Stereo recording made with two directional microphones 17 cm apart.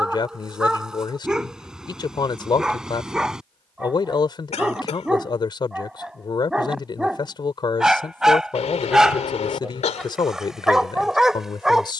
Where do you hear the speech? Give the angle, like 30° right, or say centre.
30° left.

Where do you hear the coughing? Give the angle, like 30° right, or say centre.
40° left.